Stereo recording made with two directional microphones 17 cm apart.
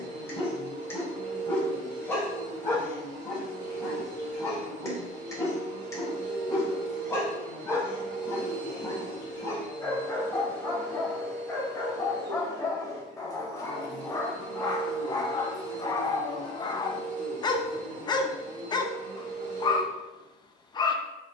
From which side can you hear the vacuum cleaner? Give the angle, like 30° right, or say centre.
60° right.